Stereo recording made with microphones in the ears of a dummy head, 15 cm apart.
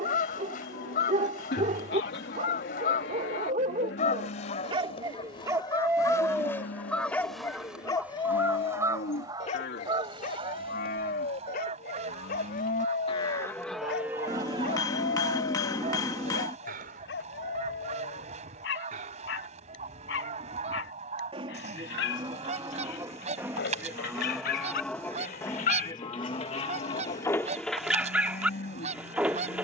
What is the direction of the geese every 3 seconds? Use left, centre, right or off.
left, left, centre, right, right, right, right, right, right, right.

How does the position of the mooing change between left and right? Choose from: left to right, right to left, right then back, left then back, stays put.
right then back.